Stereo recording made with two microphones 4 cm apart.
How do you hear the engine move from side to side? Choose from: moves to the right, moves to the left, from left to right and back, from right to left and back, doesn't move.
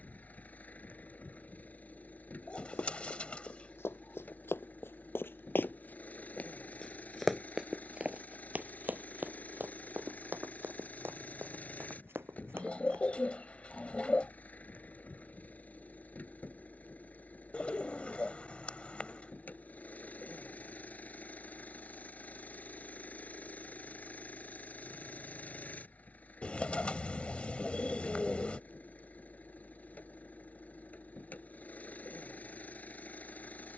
doesn't move.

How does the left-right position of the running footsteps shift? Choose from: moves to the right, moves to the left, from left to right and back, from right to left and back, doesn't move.
moves to the right.